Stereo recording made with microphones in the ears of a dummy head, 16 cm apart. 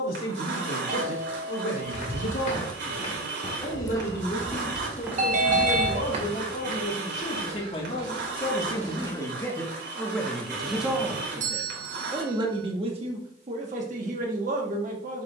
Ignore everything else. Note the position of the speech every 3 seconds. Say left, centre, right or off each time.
left, left, left, centre, right.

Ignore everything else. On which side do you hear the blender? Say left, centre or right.
right.